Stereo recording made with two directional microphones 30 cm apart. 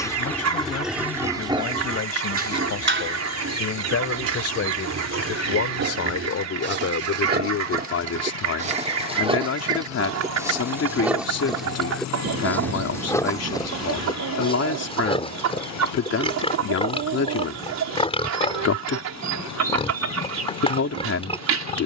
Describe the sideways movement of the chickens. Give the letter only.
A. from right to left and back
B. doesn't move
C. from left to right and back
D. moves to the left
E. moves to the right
B.